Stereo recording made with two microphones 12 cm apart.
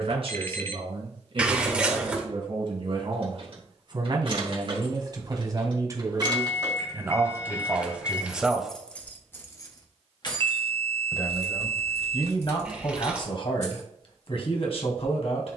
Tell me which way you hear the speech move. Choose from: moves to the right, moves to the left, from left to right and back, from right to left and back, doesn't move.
moves to the left.